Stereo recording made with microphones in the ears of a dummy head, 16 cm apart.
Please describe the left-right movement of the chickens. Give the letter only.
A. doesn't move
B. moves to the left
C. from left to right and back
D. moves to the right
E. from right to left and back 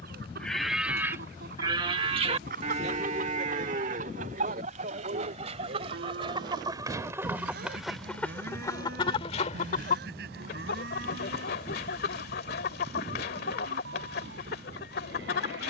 B.